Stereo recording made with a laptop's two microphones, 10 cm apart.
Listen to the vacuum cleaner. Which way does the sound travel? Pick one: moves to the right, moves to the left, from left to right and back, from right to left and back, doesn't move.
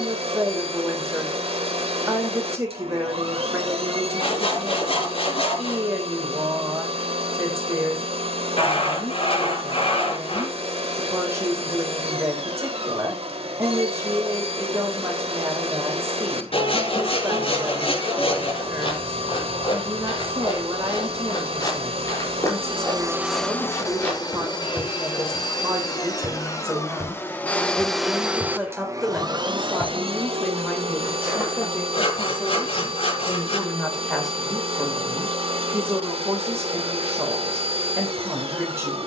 from right to left and back.